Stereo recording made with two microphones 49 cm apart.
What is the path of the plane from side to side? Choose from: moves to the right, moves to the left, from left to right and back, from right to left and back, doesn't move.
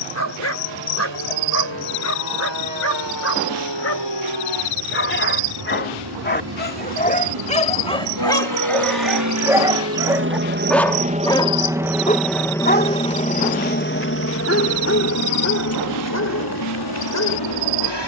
moves to the left.